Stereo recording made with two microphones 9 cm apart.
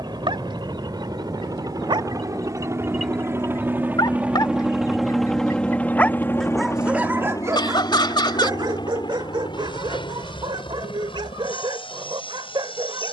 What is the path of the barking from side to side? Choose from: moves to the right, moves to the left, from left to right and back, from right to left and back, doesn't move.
from right to left and back.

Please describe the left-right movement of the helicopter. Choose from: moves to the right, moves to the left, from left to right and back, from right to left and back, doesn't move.
moves to the left.